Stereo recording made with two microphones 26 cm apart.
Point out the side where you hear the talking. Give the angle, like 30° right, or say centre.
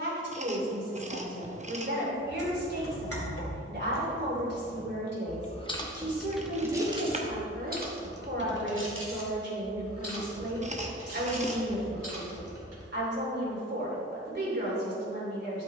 40° right.